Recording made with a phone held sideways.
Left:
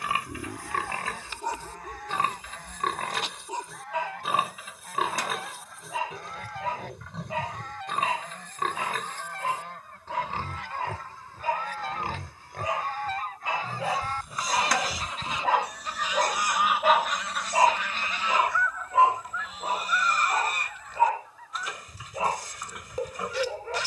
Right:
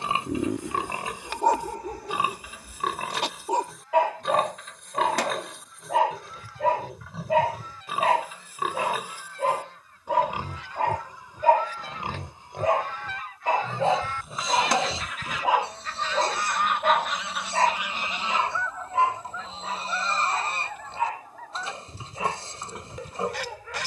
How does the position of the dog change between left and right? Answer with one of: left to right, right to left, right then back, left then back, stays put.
right to left.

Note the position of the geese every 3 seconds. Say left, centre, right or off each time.
left, left, left, left, left, centre, right, right.